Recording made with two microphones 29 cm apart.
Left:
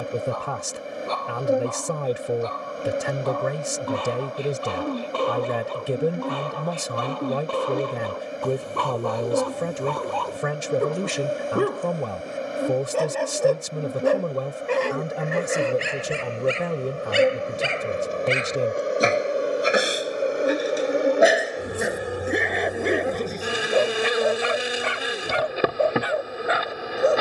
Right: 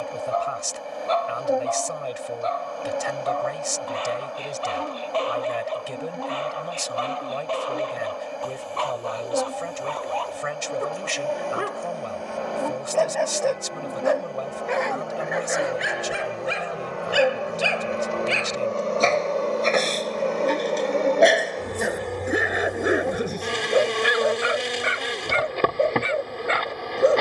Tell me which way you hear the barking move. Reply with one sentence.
In this clip you hear the barking move from left to right.